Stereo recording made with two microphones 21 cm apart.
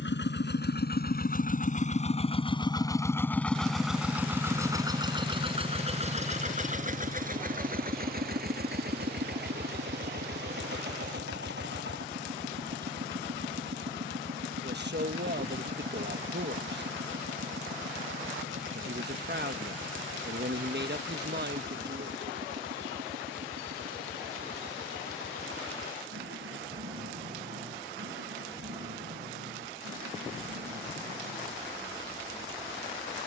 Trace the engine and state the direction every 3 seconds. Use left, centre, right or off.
left, centre, right, right, right, right, right, right, right, right, right.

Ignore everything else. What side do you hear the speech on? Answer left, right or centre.
right.